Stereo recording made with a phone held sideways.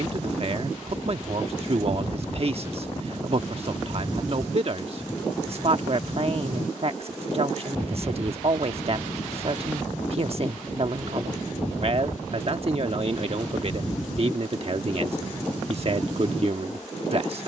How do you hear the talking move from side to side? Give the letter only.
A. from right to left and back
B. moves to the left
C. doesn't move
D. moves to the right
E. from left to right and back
C.